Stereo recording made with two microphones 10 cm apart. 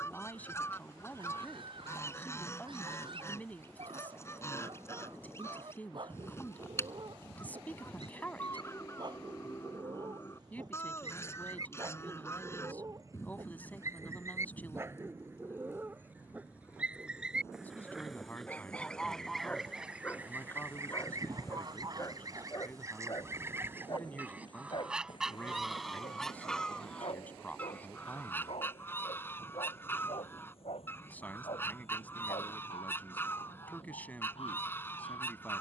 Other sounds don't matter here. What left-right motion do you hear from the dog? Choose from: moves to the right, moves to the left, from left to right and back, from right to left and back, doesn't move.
moves to the left.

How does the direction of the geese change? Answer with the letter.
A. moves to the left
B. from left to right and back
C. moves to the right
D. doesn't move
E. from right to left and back
B.